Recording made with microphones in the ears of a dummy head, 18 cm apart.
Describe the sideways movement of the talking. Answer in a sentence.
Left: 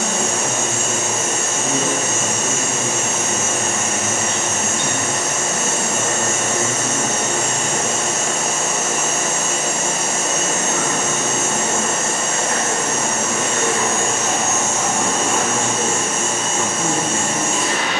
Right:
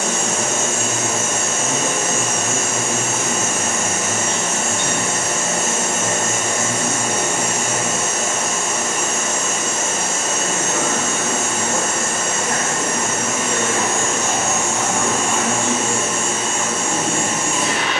You can hear the talking move from left to right and back again.